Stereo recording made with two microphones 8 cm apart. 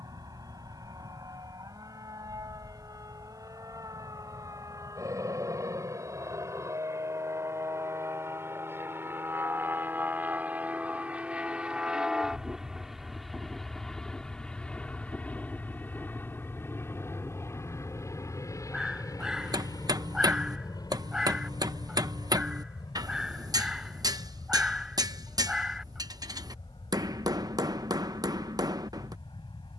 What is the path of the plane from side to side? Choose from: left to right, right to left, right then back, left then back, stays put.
right to left.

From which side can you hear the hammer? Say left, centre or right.
right.